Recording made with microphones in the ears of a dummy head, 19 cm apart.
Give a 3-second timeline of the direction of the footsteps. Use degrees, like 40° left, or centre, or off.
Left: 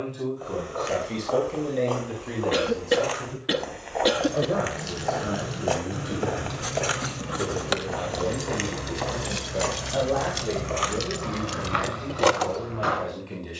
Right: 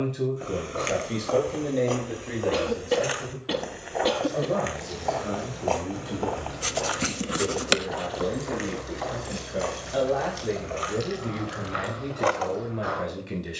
20° right, centre, 30° left, 60° left, 70° left.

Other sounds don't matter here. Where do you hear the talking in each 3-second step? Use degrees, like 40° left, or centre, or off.
centre, 10° left, 10° left, 10° right, 20° right.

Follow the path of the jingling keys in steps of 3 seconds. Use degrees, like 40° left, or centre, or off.
off, 80° left, 70° left, 60° left, 50° left.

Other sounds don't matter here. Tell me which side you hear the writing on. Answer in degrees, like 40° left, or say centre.
30° right.